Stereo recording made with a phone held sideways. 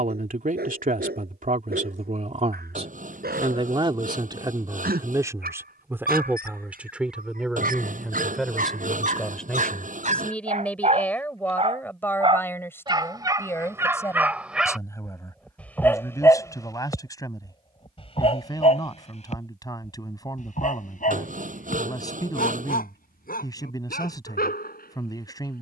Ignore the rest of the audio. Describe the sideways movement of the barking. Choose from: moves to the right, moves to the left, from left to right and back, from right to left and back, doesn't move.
moves to the left.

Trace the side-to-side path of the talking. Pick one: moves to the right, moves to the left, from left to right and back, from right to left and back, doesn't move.
moves to the left.